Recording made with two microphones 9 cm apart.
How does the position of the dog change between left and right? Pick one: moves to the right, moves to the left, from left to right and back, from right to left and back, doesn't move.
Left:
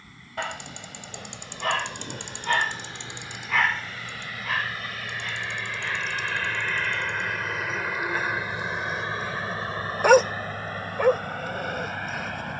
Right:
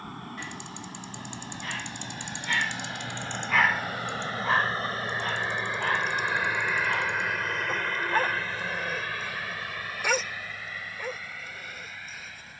from left to right and back.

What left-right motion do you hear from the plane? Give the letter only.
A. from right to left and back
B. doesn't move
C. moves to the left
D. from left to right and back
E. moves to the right
C.